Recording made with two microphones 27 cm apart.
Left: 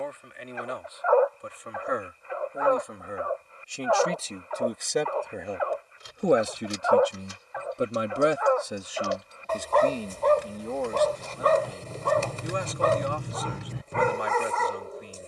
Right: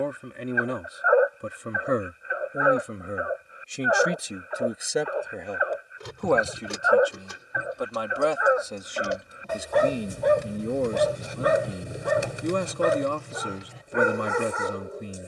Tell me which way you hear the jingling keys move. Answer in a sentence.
You can hear the jingling keys go from the right side to the left.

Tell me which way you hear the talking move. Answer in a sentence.
In this clip you hear the talking move from right to left and back again.